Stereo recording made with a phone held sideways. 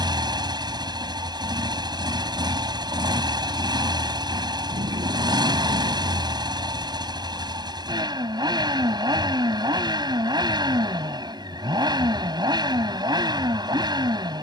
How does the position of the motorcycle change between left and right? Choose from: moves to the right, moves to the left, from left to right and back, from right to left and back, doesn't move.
doesn't move.